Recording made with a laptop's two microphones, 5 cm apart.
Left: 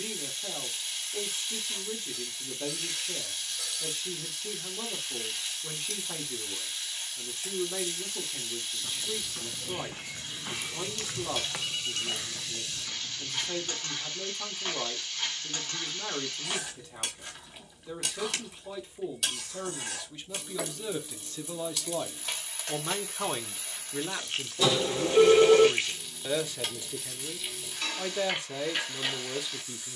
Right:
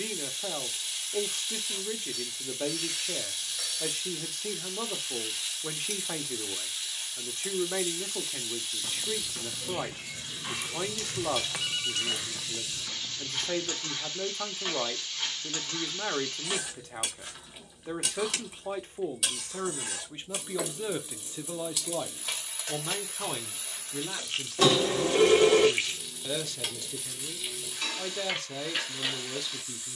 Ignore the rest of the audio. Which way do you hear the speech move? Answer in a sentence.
In this clip you hear the speech move to the left.